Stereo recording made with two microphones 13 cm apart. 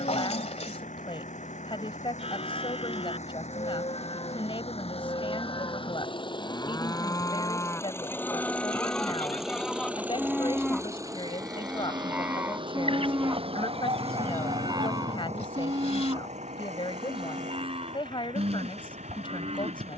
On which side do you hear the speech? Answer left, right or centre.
left.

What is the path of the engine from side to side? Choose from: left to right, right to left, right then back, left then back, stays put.
left to right.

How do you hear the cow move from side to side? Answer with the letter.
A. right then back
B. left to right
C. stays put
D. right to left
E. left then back
B.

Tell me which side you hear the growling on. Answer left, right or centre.
left.